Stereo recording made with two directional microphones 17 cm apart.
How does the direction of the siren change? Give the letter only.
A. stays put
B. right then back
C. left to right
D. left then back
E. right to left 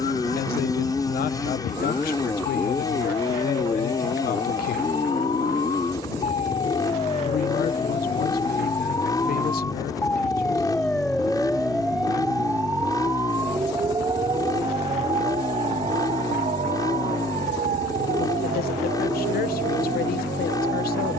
C.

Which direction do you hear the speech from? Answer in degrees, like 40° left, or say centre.
60° left.